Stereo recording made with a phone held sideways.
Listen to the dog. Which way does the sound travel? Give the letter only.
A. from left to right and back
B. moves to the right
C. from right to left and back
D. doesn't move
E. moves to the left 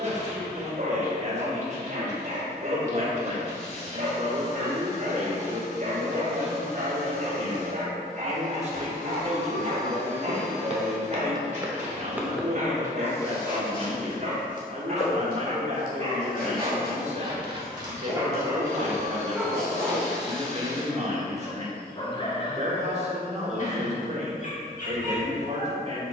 E.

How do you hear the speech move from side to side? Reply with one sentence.
You can hear the speech stay in one place.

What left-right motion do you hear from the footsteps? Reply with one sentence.
You can hear the footsteps travel towards the left.